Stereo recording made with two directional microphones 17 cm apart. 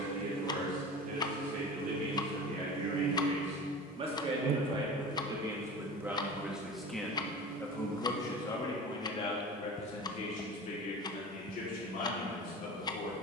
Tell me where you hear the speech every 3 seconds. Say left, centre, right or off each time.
right, right, centre, left, left.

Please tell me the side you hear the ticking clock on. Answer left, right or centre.
left.